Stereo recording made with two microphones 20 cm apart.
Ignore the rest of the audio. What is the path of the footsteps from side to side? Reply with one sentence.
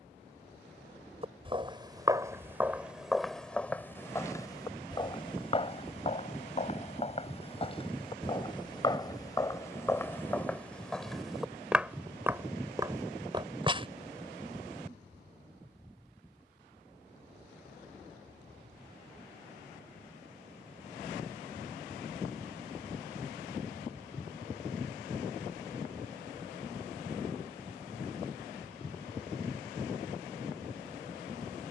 In this clip you hear the footsteps move from right to left and back again.